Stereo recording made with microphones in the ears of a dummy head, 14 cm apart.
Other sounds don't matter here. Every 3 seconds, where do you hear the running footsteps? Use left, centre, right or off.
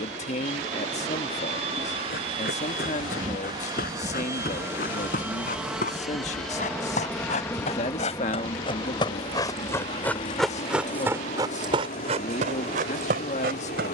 left, left, left, centre, right.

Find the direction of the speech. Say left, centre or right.
left.